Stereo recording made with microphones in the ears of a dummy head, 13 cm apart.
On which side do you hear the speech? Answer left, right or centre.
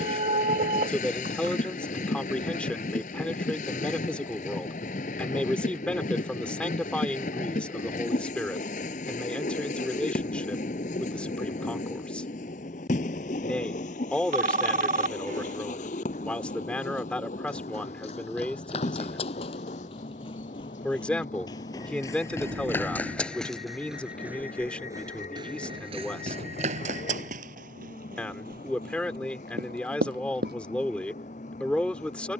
centre.